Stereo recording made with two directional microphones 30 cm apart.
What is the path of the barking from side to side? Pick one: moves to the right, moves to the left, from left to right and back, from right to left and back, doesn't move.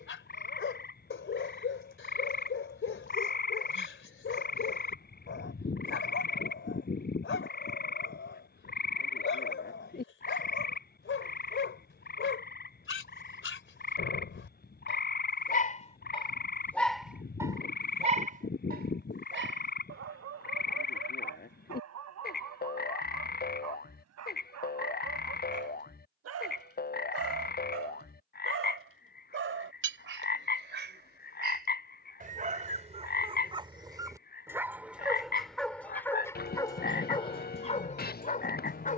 from left to right and back.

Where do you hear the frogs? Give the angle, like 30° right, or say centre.
30° left.